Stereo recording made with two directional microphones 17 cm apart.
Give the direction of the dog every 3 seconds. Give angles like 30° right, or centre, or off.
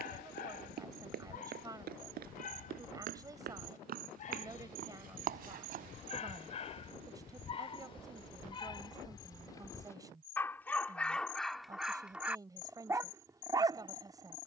50° left, 50° left, 30° left, 10° left, 20° right.